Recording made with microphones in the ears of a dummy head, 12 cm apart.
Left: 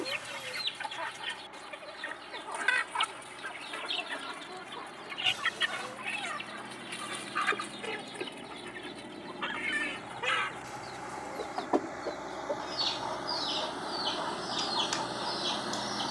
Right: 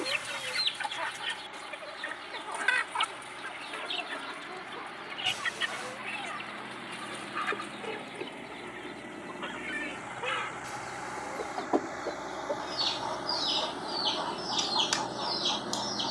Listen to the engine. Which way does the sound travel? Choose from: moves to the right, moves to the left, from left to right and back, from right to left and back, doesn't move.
moves to the left.